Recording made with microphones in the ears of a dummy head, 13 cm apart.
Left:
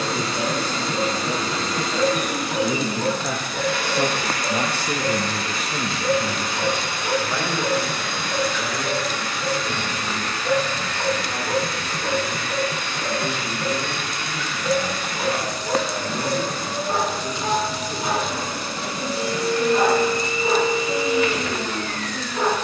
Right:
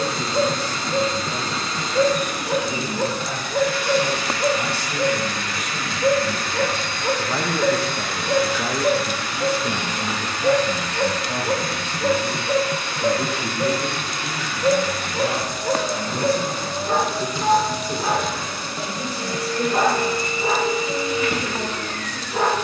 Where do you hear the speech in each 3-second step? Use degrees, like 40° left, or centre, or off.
70° left, 50° left, 10° right, 50° right, 60° right, 70° right, 70° right, 70° right.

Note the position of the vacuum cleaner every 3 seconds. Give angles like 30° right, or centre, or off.
50° left, 40° left, 10° left, 20° right, 30° right, 20° right, 40° left, 50° left.